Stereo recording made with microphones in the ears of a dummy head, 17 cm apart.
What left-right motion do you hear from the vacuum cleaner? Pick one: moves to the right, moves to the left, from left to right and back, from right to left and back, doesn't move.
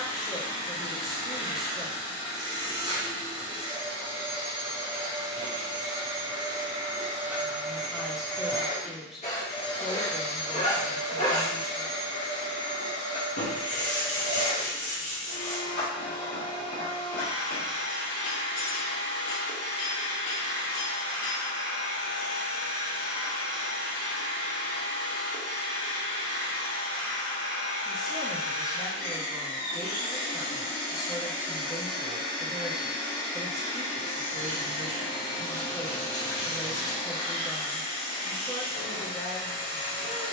moves to the left.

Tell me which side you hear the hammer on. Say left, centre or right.
left.